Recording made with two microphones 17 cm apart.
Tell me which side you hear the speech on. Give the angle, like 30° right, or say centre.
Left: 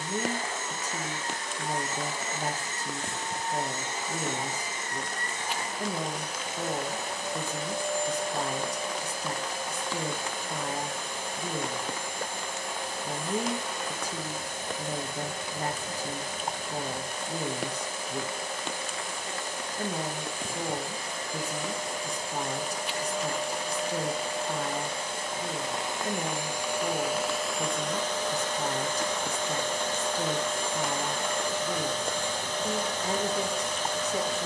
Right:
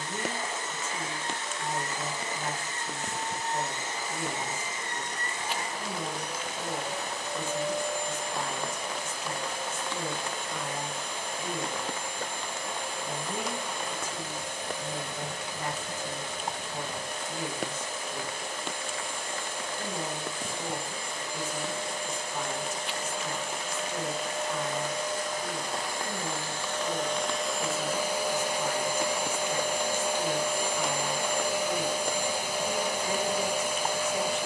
40° left.